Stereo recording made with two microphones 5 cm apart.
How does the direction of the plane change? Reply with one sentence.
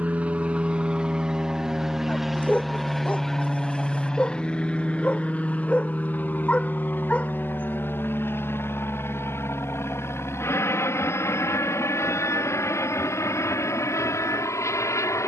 You can hear the plane travel towards the left.